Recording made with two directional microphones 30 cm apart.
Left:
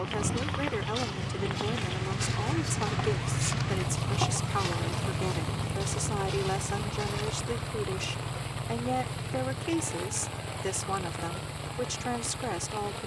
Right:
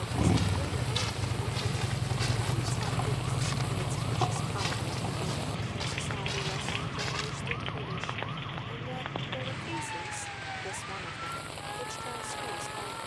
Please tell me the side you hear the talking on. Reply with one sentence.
In this clip you hear the talking on the left.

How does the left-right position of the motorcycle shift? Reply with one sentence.
You can hear the motorcycle go from the right side to the left.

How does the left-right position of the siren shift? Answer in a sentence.
You can hear the siren move to the right.